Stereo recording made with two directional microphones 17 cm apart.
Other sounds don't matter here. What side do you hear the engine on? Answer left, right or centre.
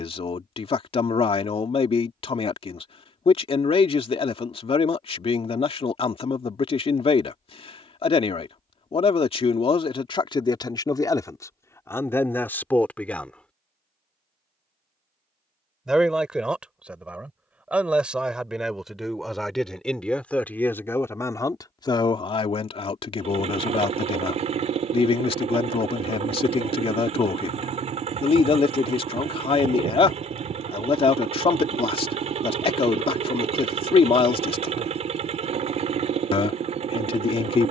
right.